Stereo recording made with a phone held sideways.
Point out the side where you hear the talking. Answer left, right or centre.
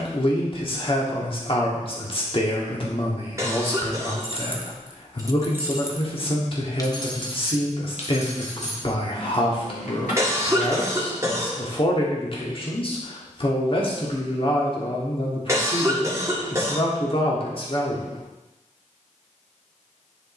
left.